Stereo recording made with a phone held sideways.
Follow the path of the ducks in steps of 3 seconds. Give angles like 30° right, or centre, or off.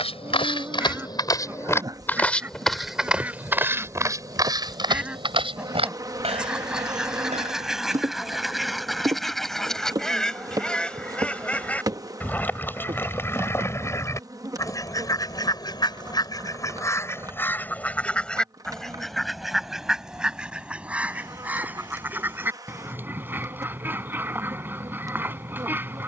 10° right, 10° right, centre, 10° left, 20° left, 20° left, centre, 10° right, 10° right.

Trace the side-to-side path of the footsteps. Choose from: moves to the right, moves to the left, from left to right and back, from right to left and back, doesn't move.
moves to the right.